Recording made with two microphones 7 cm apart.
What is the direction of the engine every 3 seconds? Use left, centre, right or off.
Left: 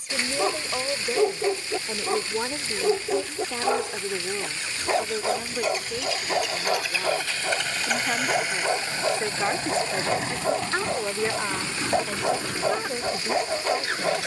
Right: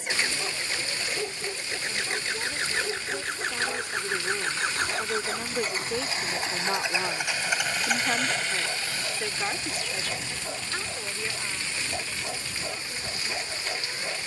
right, right, centre, left, left.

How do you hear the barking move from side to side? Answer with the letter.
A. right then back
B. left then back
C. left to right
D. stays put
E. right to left
D.